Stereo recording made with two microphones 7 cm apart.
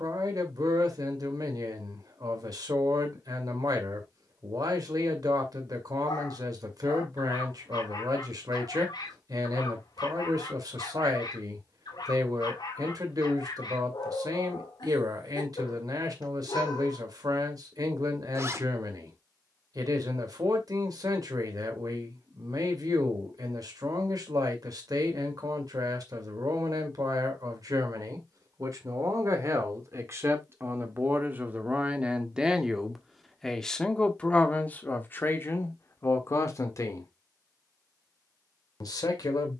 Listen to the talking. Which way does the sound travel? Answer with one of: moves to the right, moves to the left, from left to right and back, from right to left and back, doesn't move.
moves to the left.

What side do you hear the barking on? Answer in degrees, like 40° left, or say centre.
70° left.